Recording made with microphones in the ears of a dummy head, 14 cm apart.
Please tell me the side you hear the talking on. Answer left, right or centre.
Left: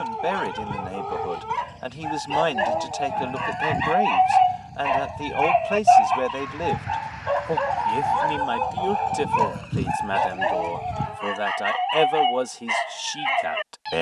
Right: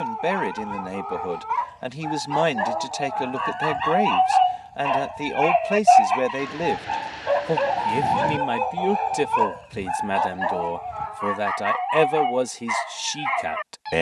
centre.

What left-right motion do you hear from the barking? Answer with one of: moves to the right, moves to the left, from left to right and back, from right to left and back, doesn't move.
from left to right and back.